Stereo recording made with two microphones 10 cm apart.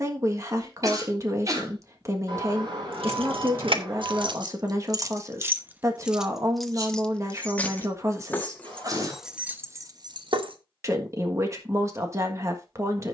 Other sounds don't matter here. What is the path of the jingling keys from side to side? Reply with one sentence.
In this clip you hear the jingling keys move from right to left and back again.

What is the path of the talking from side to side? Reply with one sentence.
You can hear the talking stay in one place.